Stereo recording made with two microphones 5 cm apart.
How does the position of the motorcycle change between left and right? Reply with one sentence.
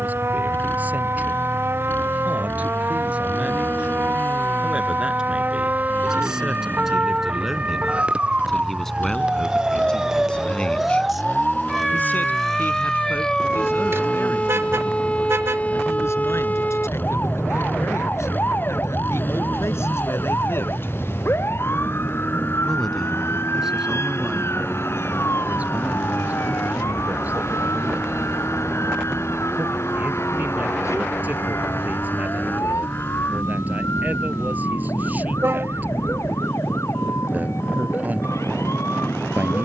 In this clip you hear the motorcycle stay in one place.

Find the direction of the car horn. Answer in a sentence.
In this clip you hear the car horn on the right.